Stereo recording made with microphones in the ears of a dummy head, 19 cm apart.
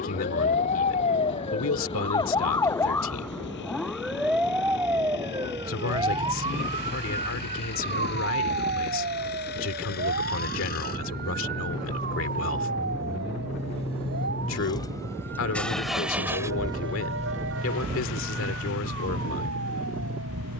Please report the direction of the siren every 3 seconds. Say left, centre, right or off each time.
left, centre, right, right, right, right, right.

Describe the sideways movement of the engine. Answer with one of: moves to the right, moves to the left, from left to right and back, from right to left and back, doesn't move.
moves to the right.